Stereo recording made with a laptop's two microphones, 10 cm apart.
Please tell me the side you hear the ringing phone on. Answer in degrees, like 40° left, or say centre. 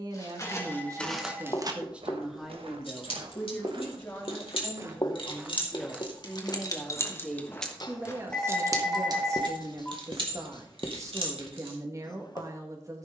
10° left.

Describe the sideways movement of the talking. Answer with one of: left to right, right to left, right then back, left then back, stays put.
left then back.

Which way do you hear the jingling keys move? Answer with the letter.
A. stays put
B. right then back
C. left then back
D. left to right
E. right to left
D.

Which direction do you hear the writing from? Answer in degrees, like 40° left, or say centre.
50° left.